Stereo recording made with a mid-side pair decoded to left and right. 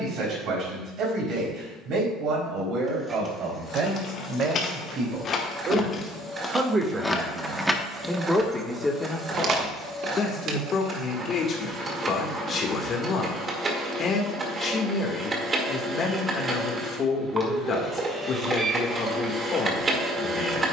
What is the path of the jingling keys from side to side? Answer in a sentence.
In this clip you hear the jingling keys move from left to right.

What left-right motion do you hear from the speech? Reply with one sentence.
You can hear the speech go from the right side to the left.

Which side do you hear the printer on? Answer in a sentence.
You can hear the printer on the right.